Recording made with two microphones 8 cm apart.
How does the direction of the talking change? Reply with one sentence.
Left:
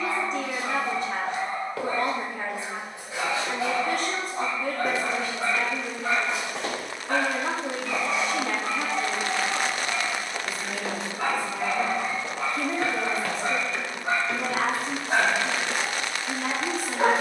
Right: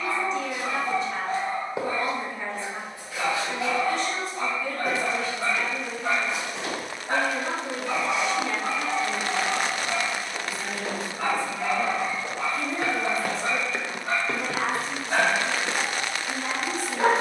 In this clip you hear the talking stay in one place.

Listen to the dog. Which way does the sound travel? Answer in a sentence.
In this clip you hear the dog move from left to right and back again.